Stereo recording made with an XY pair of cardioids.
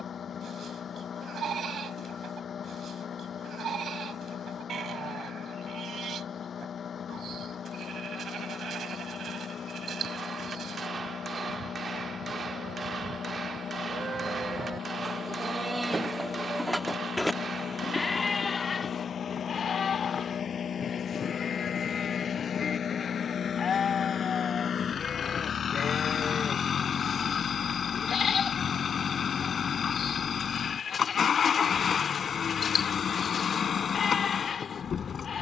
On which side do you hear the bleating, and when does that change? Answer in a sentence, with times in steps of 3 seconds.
In this clip you hear the bleating on the right from 0 s, in the centre from 15 s and on the left from 18 s.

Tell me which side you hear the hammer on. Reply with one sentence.
In this clip you hear the hammer on the right.